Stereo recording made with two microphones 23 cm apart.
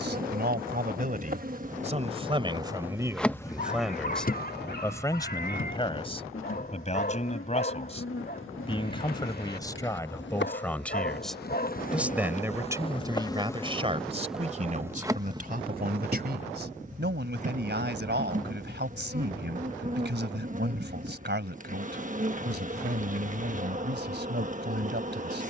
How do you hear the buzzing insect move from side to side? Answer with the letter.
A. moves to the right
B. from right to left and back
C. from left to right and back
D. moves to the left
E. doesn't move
B.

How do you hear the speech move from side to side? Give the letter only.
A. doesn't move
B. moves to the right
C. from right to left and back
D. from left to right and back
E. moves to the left
C.